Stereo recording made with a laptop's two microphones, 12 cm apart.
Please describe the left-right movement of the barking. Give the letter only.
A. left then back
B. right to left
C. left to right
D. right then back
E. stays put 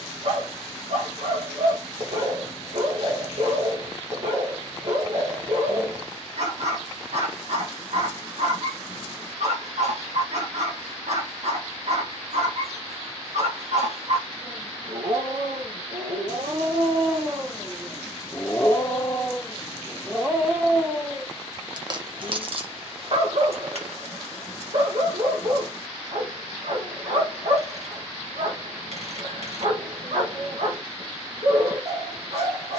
A.